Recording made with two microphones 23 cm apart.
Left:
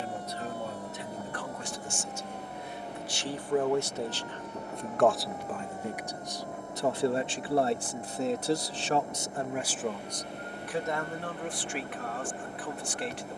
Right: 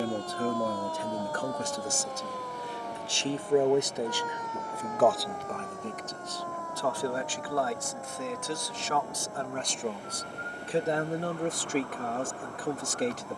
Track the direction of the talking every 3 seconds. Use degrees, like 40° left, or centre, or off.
40° right, 10° right, 30° left, 20° right, 40° right.